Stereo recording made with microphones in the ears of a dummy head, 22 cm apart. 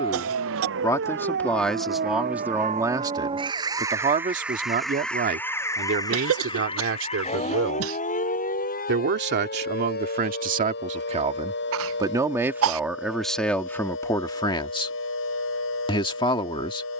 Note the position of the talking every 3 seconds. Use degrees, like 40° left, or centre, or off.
centre, 30° right, 50° right, 40° right, centre, 20° left.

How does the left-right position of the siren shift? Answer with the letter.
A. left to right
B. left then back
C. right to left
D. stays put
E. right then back
C.